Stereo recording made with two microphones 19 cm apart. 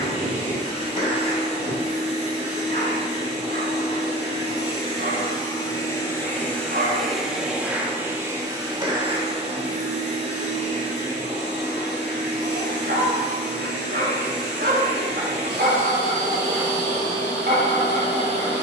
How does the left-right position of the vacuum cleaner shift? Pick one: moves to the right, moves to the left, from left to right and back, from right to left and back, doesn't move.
moves to the right.